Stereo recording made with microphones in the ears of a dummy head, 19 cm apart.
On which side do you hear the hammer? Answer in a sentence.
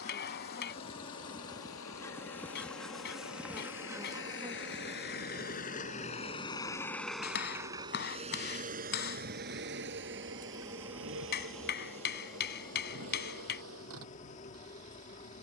In this clip you hear the hammer on the left.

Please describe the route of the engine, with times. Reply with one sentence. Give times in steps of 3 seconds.
In this clip you hear the engine on the left from 0 s, in the centre from 6 s and on the right from 9 s.